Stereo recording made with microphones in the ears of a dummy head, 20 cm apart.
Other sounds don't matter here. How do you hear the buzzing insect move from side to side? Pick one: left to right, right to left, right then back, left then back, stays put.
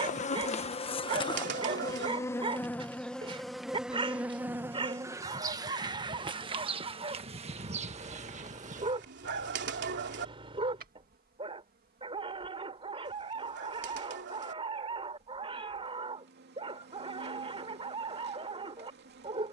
left to right.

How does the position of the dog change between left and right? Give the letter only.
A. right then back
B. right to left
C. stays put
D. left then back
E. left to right
C.